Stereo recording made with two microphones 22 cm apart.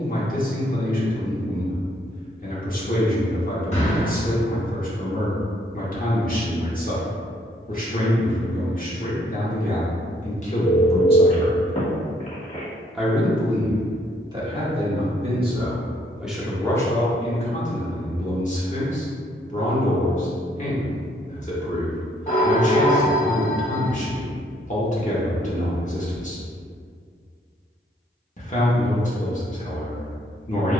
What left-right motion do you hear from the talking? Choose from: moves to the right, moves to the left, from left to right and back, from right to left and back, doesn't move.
from left to right and back.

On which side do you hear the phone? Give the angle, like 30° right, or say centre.
30° left.